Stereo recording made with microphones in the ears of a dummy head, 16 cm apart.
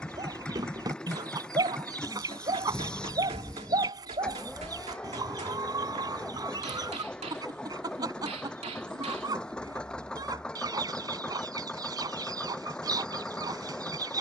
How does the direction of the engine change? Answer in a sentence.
In this clip you hear the engine stay put.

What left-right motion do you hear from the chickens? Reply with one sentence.
You can hear the chickens stay put.